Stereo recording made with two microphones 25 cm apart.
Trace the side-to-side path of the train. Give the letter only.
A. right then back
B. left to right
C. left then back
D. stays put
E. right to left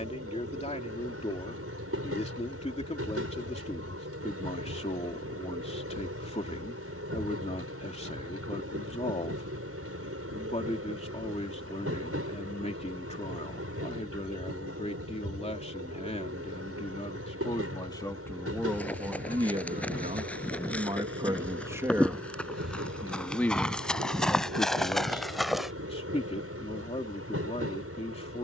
D.